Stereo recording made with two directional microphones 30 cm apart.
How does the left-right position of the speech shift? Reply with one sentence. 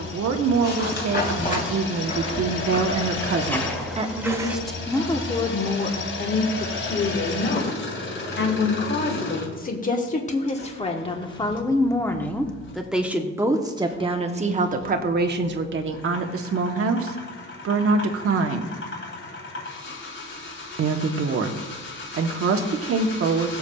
In this clip you hear the speech go left and come back.